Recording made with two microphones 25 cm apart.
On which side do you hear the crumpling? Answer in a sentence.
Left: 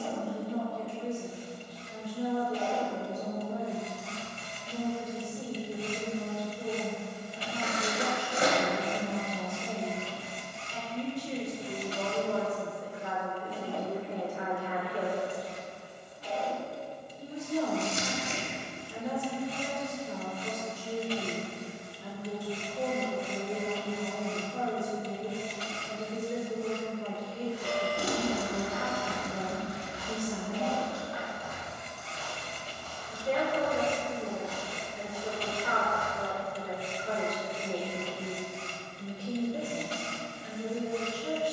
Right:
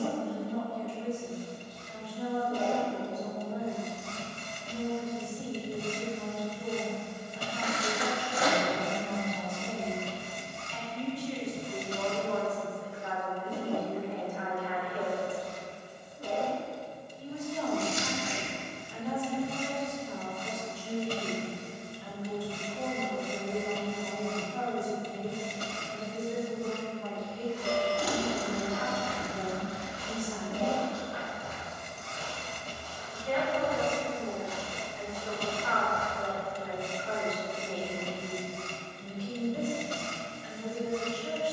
In this clip you hear the crumpling on the left.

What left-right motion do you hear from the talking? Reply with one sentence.
You can hear the talking stay put.